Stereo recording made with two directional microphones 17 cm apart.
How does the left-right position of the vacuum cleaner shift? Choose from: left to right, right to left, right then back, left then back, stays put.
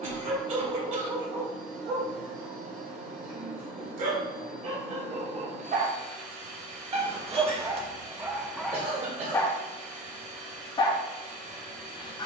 stays put.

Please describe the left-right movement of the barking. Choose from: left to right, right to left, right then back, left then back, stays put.
right to left.